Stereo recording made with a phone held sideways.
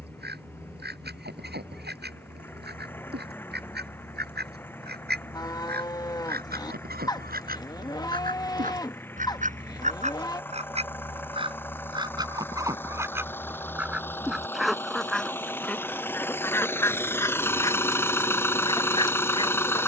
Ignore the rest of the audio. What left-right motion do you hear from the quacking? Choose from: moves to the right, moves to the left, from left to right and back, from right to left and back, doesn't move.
moves to the left.